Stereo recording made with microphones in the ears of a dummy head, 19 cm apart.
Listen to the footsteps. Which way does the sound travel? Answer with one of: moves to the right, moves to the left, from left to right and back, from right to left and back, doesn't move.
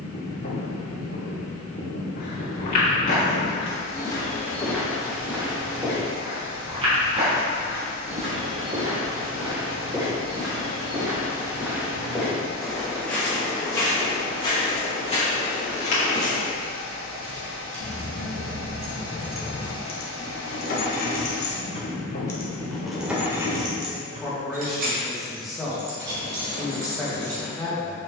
from left to right and back.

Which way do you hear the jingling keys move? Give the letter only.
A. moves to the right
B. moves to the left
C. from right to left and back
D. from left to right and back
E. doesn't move
C.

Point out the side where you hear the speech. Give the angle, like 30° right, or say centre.
centre.